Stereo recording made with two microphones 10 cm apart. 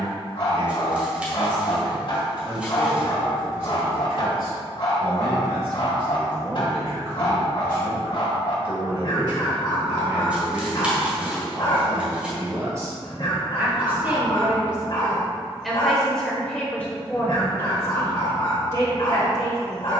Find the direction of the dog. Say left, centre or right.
left.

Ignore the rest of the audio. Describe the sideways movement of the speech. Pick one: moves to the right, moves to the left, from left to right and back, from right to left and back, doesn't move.
moves to the left.